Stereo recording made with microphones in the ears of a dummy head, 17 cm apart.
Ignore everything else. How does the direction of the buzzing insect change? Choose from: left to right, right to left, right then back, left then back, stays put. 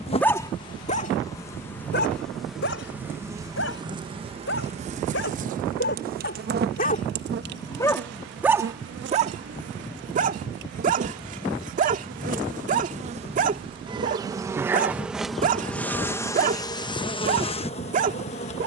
right then back.